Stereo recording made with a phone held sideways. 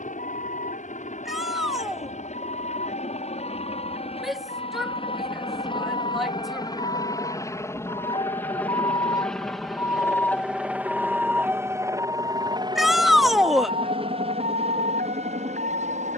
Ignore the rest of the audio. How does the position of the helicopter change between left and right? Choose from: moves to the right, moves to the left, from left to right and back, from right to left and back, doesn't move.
moves to the right.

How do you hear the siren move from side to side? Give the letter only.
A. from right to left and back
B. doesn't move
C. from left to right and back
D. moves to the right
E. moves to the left
D.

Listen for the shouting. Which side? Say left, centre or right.
centre.